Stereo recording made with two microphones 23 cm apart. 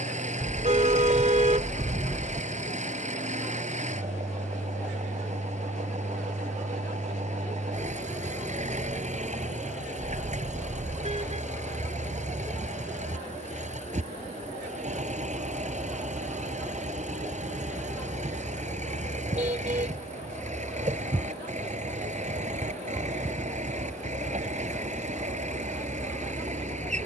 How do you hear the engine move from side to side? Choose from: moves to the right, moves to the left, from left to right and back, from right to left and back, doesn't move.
doesn't move.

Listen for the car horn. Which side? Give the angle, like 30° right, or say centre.
30° right.